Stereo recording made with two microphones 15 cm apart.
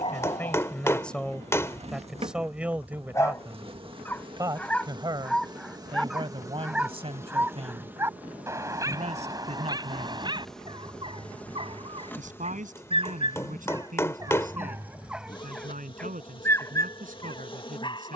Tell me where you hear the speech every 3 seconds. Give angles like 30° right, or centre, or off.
centre, 20° right, 40° right, 50° right, 60° right, 60° right.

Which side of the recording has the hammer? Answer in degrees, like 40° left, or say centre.
20° left.